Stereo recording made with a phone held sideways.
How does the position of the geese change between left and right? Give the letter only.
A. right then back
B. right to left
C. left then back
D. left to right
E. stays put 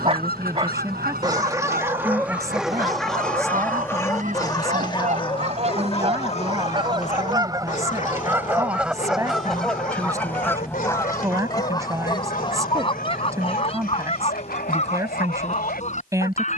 B.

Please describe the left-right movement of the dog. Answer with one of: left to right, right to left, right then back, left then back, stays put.
right to left.